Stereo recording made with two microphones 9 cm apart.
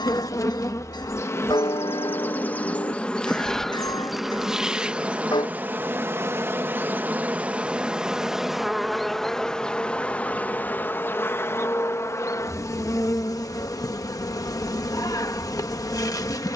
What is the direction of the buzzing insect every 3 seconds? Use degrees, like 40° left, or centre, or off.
30° left, 10° right, 10° right, 20° left, 40° left, 40° left.